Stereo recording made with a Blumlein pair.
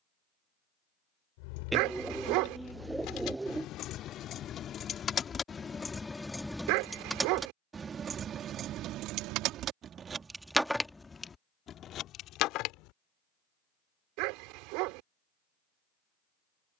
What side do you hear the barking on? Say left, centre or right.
right.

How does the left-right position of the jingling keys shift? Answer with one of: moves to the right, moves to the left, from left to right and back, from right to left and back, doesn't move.
from left to right and back.